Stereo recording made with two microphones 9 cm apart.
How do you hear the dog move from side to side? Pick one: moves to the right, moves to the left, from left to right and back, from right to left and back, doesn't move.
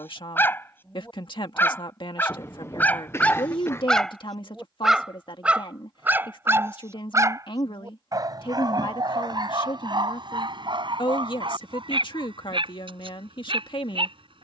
moves to the right.